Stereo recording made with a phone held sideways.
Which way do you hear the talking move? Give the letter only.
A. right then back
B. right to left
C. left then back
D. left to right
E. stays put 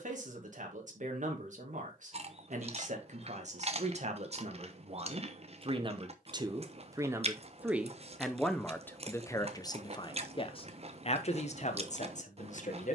B.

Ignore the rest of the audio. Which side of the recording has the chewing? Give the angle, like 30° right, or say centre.
50° right.